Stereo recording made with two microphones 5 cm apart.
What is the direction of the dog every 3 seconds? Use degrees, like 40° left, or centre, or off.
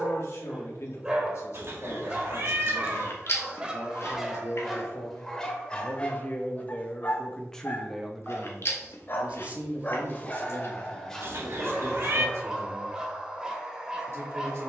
20° right, centre, 40° left, 20° left, 20° right.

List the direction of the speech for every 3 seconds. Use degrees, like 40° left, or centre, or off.
60° left, 60° left, 10° left, 40° right, 60° right.